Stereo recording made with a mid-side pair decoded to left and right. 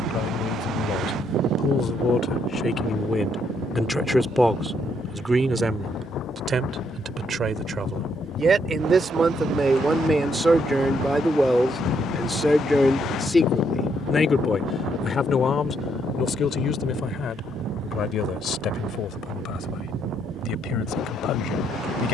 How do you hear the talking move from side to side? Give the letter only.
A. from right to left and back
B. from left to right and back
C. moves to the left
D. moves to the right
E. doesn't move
B.